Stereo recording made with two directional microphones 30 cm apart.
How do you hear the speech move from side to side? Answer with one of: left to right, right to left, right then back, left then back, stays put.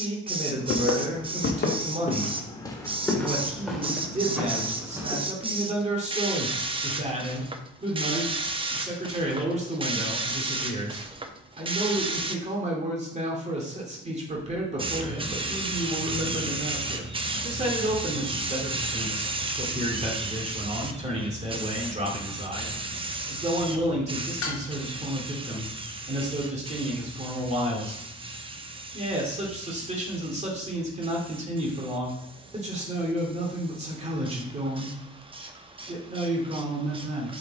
stays put.